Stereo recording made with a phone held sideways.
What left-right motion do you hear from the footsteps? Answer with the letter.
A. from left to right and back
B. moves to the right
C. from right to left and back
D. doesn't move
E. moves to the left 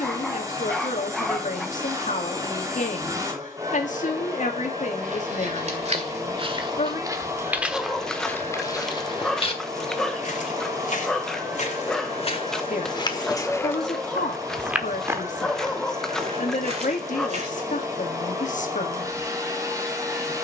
C.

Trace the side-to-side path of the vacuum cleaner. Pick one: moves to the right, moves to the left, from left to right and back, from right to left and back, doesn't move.
doesn't move.